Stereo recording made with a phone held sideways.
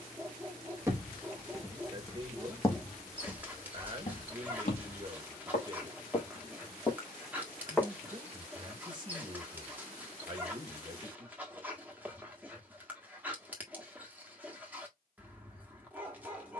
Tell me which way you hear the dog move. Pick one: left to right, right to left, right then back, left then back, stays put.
stays put.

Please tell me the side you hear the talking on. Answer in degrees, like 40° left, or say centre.
30° right.